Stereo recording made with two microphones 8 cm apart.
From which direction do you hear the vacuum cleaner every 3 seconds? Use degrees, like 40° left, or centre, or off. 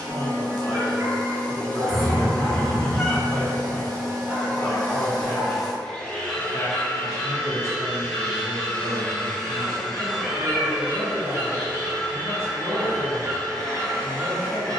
50° right, 40° right, 40° left, 10° right, 40° right.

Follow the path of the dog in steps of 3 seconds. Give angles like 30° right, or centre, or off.
60° right, 20° right, centre, 40° right, 50° right.